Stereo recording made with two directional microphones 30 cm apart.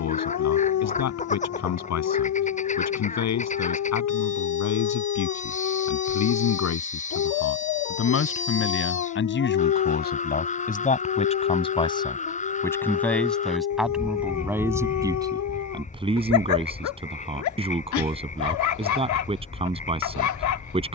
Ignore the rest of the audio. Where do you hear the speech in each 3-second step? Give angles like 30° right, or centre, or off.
60° left, 60° left, 50° left, 30° left, centre, 20° right, 20° right.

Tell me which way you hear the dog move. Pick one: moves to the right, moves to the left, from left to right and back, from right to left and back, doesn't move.
doesn't move.